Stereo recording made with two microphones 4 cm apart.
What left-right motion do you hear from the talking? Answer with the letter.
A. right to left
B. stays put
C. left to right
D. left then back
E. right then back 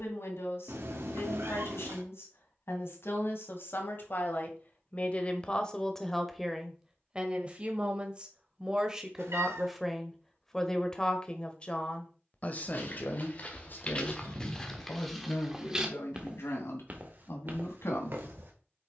E.